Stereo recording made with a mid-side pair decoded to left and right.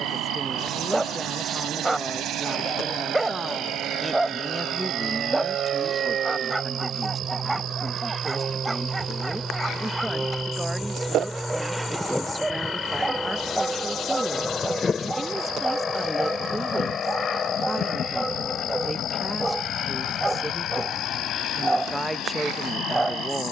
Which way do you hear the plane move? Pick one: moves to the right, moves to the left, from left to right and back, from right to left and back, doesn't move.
moves to the left.